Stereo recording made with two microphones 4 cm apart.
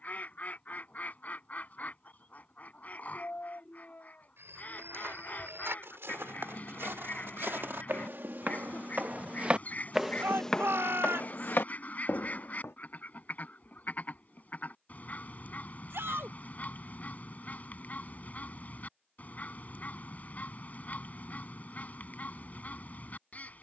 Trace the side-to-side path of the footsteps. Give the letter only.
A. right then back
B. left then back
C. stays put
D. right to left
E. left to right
D.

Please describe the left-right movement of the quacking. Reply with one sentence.
In this clip you hear the quacking stay put.